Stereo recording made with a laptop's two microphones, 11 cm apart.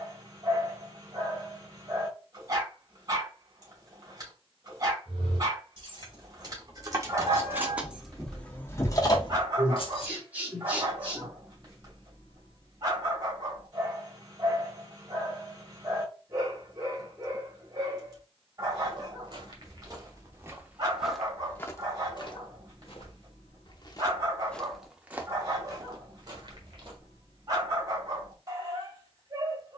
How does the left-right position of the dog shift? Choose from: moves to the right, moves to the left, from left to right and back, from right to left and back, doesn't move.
doesn't move.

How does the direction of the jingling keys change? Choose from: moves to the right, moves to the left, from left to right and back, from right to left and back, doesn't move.
moves to the left.